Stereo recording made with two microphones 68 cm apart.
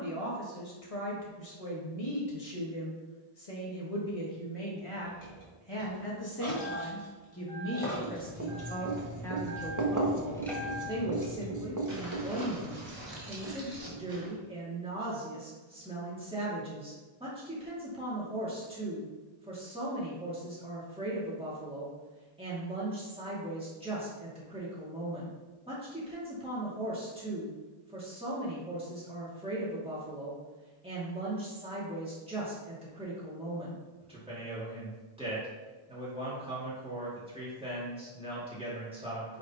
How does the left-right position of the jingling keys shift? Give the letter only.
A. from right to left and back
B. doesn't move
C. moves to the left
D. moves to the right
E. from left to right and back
D.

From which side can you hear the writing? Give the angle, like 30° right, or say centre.
30° right.